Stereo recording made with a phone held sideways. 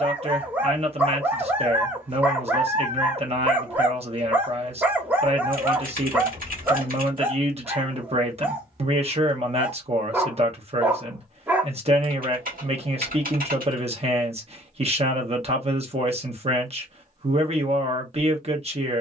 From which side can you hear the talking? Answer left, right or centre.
right.